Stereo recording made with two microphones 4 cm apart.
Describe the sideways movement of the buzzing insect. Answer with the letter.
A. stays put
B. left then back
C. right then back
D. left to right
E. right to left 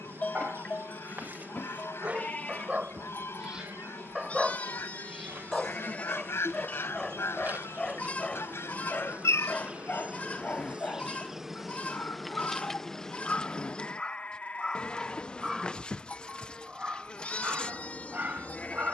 E.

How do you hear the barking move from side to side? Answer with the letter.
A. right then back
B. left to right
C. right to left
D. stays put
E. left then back
E.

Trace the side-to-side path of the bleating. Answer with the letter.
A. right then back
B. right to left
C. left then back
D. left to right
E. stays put
E.